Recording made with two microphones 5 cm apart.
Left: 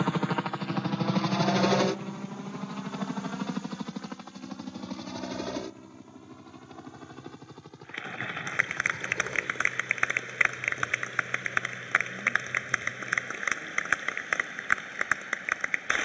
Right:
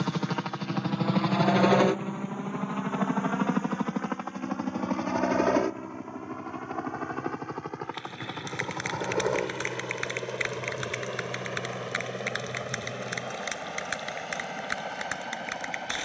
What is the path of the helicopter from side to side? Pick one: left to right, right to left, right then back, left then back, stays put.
left to right.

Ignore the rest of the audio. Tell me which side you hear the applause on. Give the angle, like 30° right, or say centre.
30° left.